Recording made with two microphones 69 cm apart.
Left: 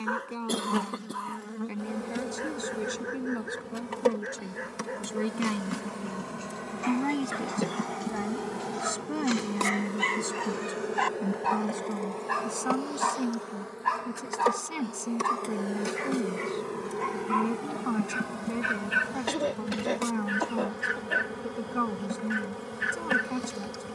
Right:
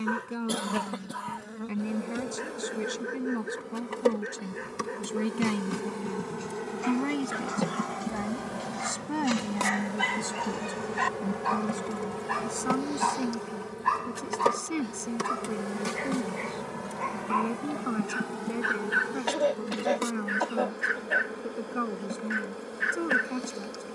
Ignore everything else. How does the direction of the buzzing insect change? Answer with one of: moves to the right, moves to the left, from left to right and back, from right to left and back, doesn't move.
from left to right and back.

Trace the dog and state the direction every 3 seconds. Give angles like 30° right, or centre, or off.
50° right, 50° right, 40° right, 20° right, 20° left, 40° left, 60° left, 60° left.